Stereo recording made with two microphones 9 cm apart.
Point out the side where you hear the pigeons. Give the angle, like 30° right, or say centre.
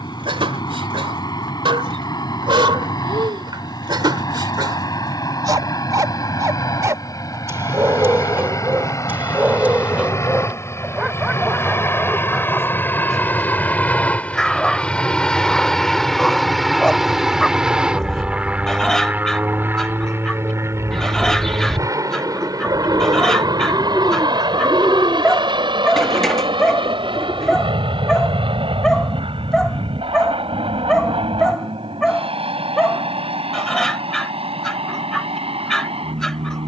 centre.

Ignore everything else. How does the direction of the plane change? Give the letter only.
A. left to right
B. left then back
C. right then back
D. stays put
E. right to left
A.